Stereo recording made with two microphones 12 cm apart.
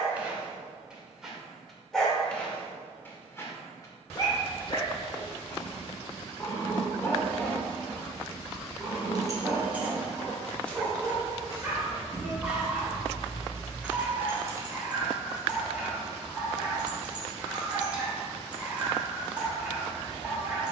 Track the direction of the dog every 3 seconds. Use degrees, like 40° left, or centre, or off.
centre, 30° left, 10° left, 10° right, 10° right, 10° right, 10° right.